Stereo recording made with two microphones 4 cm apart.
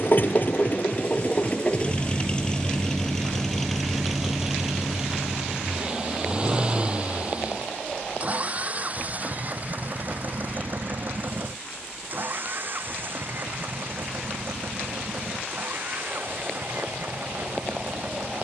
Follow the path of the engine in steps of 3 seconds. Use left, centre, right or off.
left, centre, right, right, right, right.